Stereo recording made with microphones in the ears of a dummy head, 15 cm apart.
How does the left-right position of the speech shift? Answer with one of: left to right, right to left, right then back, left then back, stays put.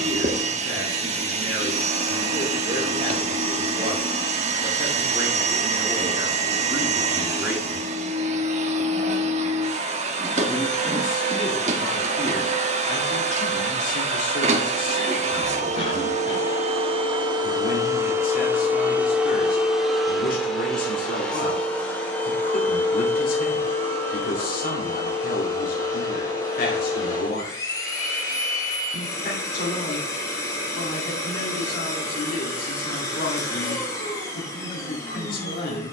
right to left.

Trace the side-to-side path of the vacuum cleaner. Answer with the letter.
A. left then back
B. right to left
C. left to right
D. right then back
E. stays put
B.